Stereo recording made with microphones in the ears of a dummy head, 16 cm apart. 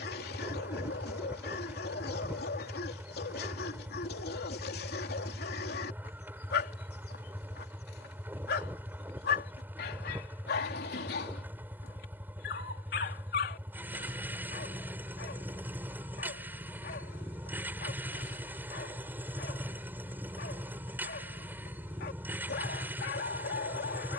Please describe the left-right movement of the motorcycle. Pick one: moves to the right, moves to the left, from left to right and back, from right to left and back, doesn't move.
doesn't move.